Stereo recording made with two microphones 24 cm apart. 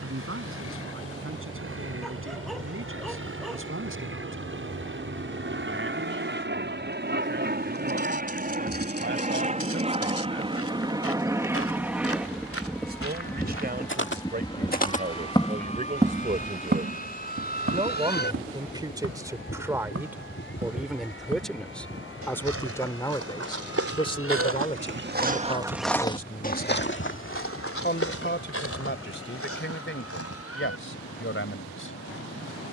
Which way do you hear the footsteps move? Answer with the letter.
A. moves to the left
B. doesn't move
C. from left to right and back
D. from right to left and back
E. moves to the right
C.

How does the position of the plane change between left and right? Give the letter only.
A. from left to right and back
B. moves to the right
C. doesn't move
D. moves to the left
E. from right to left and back
D.